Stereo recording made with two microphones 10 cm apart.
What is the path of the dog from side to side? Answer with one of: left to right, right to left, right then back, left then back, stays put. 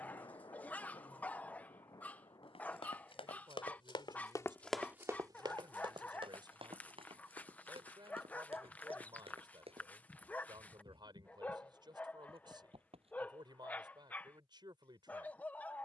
stays put.